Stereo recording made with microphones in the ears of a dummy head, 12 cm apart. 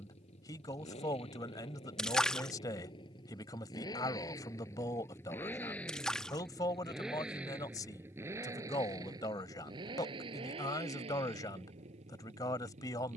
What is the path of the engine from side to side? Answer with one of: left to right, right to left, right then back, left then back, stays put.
left to right.